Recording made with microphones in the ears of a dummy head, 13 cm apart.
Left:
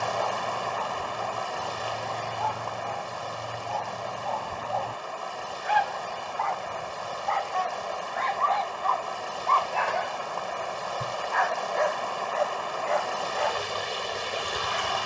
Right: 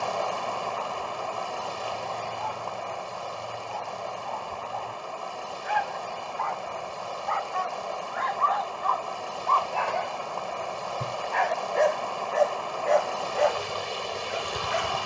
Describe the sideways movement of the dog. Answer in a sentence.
In this clip you hear the dog move to the right.